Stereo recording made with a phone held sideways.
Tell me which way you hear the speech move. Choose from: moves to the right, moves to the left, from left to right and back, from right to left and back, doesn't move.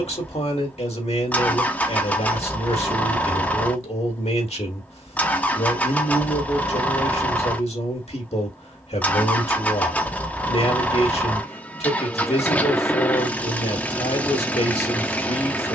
doesn't move.